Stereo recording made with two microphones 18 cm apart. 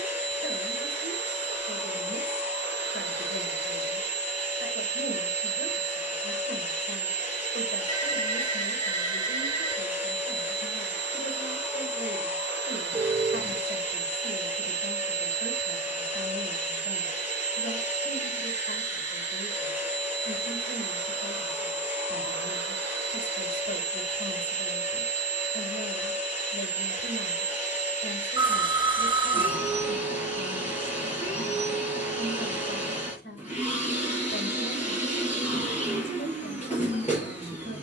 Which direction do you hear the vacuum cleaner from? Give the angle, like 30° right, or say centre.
30° left.